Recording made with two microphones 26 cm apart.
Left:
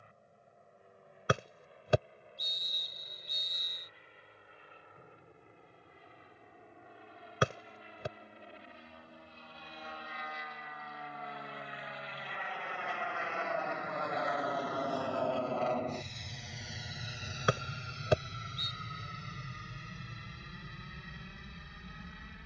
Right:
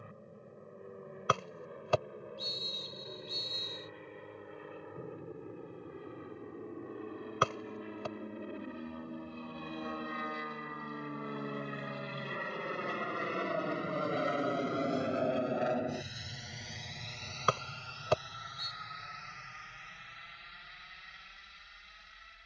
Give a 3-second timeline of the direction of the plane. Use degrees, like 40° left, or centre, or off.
80° right, 70° right, 70° right, 60° right, 40° right, centre, 40° left, 50° left.